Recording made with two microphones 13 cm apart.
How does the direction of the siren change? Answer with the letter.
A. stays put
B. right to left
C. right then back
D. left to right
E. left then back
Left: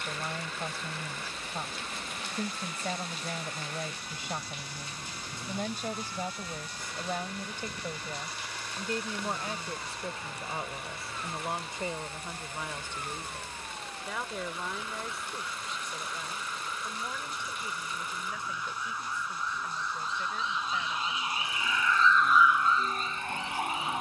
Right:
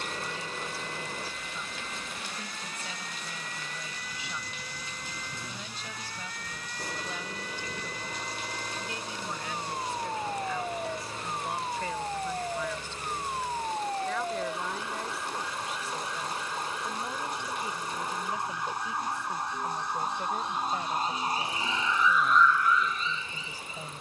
B.